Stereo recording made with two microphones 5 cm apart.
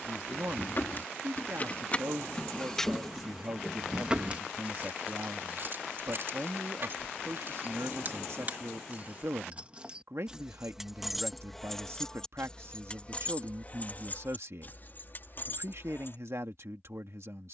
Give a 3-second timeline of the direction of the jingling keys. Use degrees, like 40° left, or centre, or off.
30° left, 20° right, 50° right, 10° right, 30° left, 50° left.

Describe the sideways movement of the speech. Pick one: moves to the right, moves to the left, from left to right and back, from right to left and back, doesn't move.
doesn't move.